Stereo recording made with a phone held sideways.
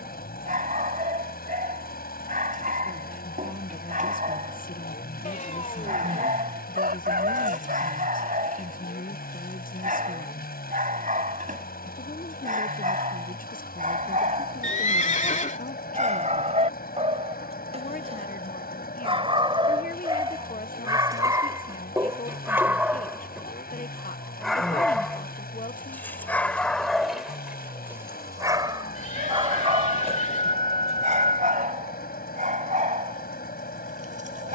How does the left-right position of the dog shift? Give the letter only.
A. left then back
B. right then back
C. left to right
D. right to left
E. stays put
A.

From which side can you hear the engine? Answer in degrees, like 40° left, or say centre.
80° left.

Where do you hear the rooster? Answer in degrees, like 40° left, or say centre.
70° right.